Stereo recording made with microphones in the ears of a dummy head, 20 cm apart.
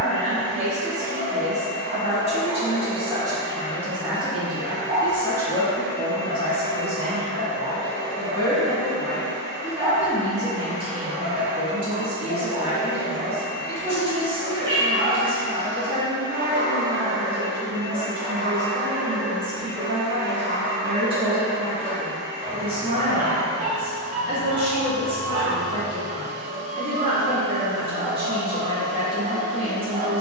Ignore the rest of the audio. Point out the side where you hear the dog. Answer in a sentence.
In this clip you hear the dog on the right.